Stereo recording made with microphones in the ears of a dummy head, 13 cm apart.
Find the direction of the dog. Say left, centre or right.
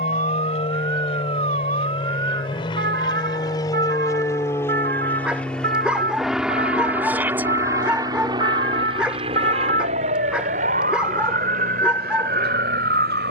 centre.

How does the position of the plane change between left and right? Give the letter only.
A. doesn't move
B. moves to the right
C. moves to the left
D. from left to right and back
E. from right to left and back
B.